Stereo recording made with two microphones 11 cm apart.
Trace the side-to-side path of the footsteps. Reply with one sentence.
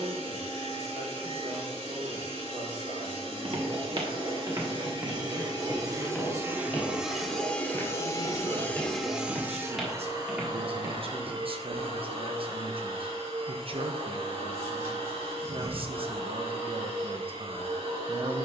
In this clip you hear the footsteps go left and come back.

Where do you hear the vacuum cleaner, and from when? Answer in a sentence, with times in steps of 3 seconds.
You can hear the vacuum cleaner on the right from 0 s, in the centre from 6 s and on the right from 9 s.